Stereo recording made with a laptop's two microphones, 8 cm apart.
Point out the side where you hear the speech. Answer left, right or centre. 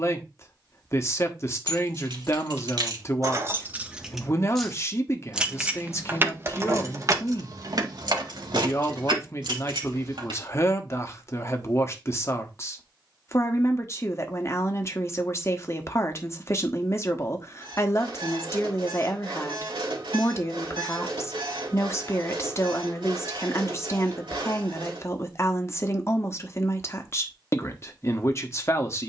left.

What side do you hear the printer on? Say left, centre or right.
right.